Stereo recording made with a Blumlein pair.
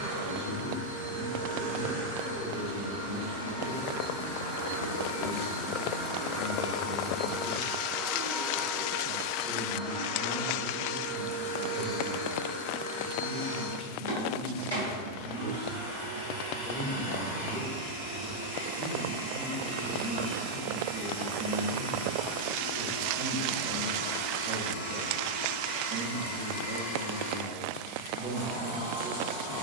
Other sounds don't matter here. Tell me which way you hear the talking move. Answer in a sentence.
You can hear the talking move to the right.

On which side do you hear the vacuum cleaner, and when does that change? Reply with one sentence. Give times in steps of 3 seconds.
In this clip you hear the vacuum cleaner on the right from 0 s, in the centre from 6 s and on the left from 9 s.